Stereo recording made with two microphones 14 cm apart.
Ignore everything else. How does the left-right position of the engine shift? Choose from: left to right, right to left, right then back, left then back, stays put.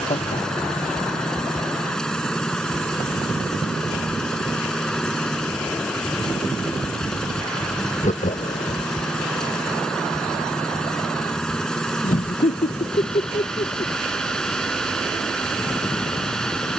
stays put.